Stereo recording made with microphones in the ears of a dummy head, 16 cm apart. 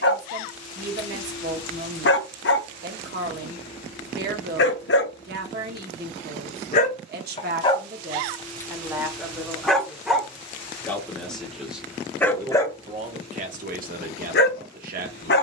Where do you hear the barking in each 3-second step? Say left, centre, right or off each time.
left, left, left, centre, left.